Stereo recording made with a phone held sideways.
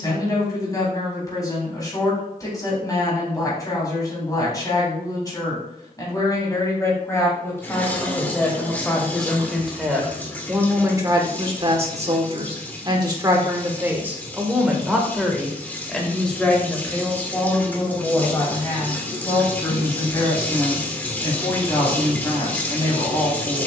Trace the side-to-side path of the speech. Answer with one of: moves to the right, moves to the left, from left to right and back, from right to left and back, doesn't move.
from left to right and back.